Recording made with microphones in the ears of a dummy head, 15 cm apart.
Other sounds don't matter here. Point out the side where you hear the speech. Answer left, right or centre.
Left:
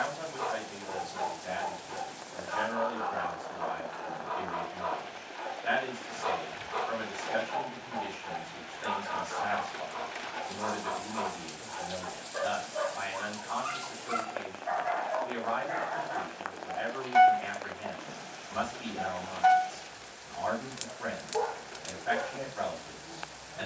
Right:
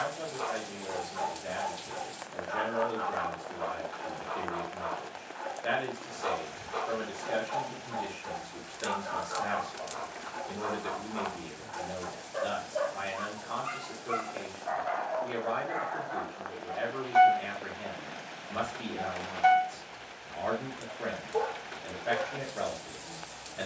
right.